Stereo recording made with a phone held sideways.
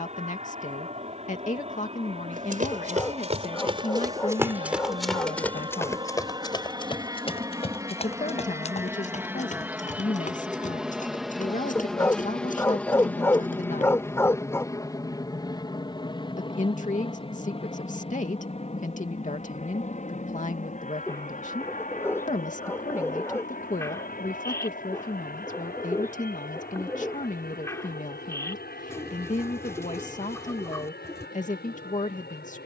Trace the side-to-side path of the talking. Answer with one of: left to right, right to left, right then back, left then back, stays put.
stays put.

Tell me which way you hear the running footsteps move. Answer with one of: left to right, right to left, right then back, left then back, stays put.
right to left.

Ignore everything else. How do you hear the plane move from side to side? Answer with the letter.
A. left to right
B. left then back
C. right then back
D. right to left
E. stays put
D.